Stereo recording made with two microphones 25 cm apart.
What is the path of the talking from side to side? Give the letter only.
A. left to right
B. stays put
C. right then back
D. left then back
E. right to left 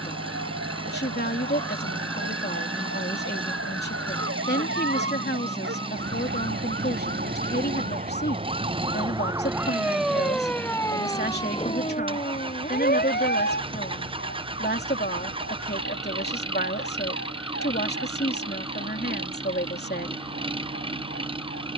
B.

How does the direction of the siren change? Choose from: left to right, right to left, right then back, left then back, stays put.
right to left.